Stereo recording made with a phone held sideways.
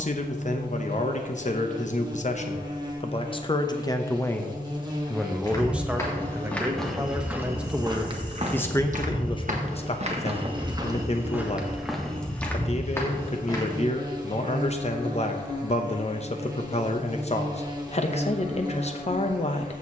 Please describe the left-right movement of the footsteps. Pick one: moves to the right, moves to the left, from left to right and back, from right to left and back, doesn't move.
from left to right and back.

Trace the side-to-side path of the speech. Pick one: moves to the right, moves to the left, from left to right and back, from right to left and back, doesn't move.
from left to right and back.